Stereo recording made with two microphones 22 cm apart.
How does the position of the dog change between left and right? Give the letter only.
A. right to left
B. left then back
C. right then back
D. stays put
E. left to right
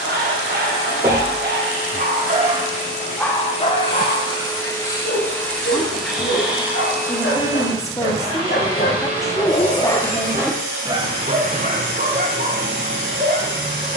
B.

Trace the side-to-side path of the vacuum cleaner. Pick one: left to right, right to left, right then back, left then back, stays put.
left to right.